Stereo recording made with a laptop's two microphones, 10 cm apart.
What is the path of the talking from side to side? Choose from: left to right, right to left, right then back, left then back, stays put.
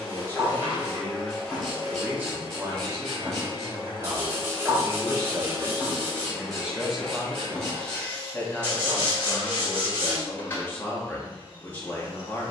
right then back.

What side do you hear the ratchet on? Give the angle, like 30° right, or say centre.
centre.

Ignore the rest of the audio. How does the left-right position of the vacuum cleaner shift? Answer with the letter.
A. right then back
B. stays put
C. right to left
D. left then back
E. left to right
A.